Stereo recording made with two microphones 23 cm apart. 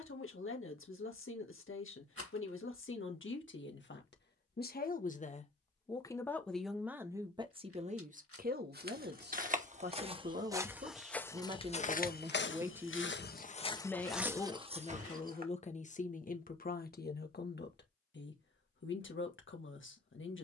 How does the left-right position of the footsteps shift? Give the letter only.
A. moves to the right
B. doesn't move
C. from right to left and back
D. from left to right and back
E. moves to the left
C.